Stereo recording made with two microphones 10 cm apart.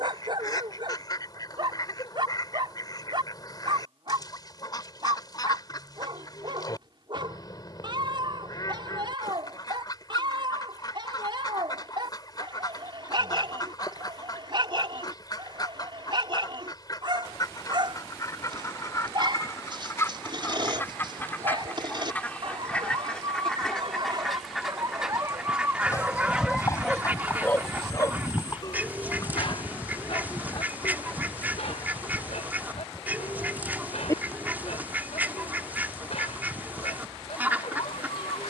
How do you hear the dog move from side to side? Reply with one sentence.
You can hear the dog move to the left.